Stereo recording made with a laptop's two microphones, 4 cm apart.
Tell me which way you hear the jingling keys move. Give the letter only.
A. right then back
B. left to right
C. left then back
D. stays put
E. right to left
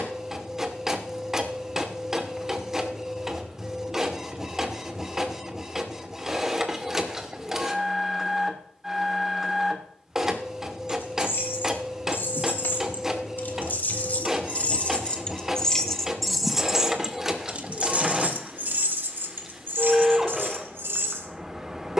B.